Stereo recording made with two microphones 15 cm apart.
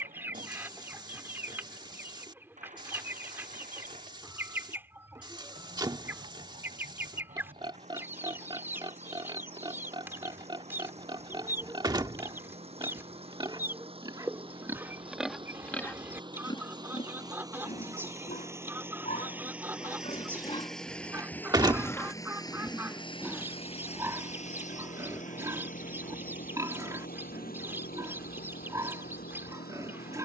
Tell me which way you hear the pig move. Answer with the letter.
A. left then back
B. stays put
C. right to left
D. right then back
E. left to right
A.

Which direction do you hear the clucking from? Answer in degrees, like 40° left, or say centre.
10° right.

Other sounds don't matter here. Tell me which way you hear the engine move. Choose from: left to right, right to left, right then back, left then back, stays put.
right to left.